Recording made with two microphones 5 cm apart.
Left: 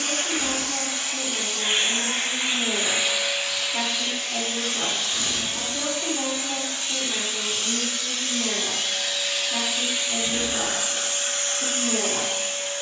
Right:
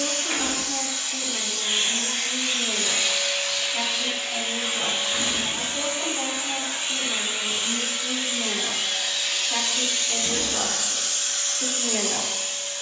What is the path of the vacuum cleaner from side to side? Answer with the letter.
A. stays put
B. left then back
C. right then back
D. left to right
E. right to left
C.